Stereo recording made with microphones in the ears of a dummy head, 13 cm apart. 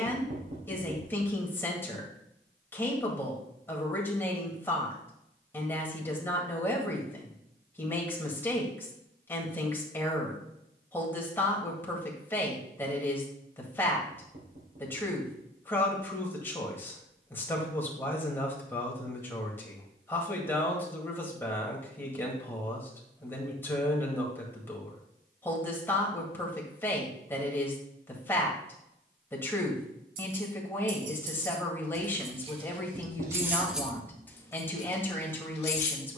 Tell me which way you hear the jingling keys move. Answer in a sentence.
You can hear the jingling keys move from right to left.